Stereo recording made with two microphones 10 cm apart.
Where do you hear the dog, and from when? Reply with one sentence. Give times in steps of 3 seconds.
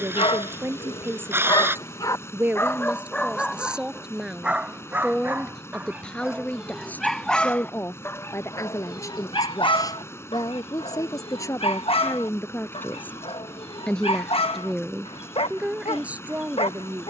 In this clip you hear the dog on the left from 0 s, in the centre from 3 s and on the left from 9 s.